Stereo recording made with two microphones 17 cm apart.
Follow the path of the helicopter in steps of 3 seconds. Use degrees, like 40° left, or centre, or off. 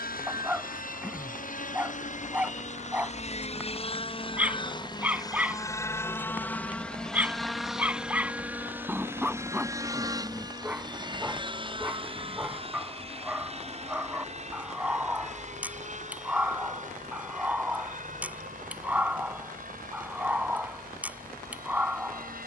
50° left, 30° left, centre, 20° right, 40° right, 40° right, 50° right, 50° right.